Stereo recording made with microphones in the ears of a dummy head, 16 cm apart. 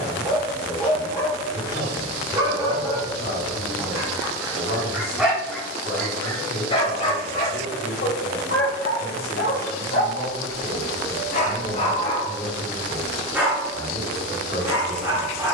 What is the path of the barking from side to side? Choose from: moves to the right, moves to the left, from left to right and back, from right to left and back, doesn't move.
from right to left and back.